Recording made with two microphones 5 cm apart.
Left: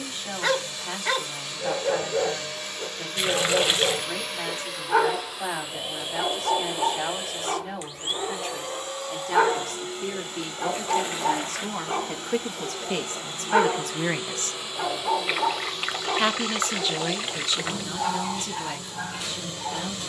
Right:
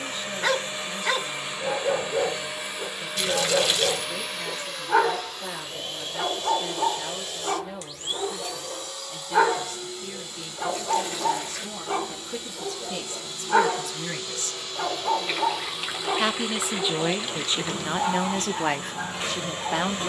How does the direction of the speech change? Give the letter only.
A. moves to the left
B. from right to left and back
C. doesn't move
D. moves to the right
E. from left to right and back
D.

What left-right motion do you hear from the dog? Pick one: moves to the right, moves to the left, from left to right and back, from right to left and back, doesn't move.
doesn't move.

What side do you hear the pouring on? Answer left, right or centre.
left.